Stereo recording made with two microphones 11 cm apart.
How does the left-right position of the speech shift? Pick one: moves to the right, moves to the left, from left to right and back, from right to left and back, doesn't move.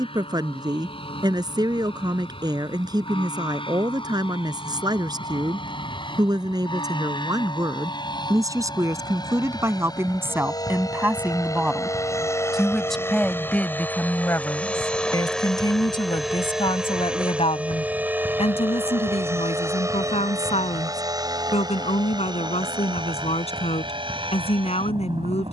moves to the left.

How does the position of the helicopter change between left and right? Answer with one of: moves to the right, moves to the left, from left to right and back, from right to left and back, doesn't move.
moves to the right.